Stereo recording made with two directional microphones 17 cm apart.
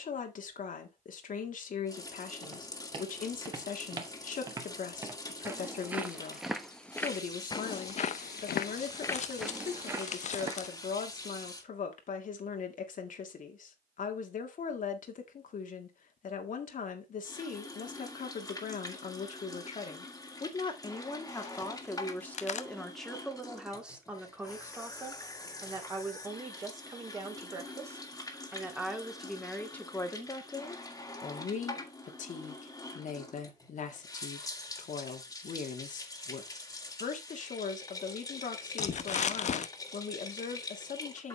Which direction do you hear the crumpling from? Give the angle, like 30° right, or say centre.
40° left.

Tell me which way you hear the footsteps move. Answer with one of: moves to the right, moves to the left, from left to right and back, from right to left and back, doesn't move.
from right to left and back.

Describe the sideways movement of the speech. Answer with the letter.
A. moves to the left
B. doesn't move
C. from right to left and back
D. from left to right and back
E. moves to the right
D.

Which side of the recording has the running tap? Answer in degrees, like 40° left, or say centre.
20° left.